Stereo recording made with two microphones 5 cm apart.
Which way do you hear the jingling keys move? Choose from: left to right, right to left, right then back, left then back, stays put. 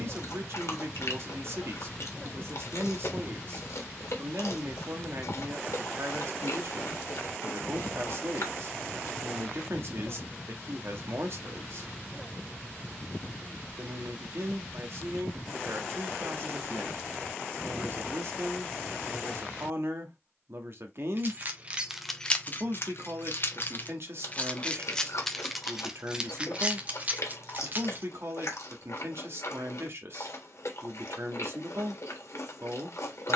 left then back.